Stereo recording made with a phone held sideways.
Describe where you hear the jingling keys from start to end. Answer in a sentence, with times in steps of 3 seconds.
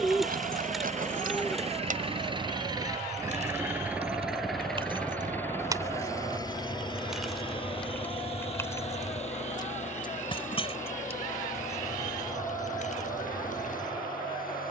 In this clip you hear the jingling keys on the right from 0 s, in the centre from 6 s and on the left from 9 s.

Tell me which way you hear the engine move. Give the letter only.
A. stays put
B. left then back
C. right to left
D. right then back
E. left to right
C.